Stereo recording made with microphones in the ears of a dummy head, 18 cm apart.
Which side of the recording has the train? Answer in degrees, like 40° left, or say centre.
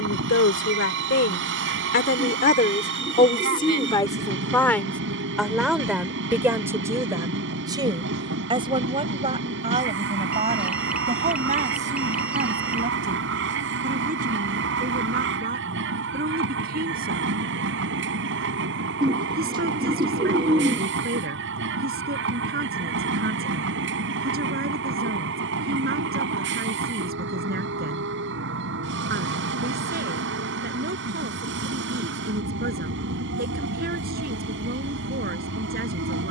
70° right.